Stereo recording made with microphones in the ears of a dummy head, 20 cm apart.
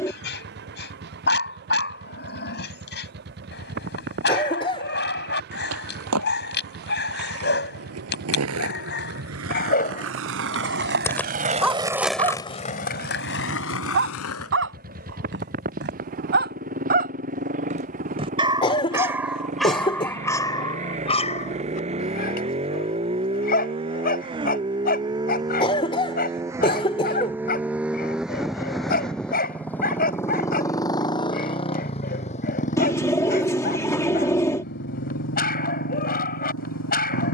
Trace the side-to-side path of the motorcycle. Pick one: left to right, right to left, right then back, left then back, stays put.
right to left.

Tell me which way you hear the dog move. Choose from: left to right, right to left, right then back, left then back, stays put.
right then back.